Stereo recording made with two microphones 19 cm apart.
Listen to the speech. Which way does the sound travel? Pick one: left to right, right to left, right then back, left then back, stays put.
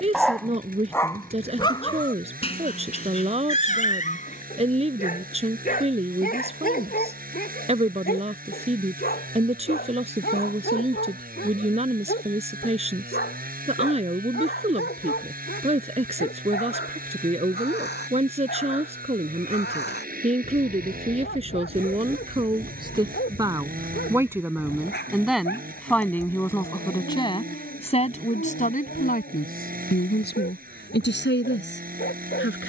right to left.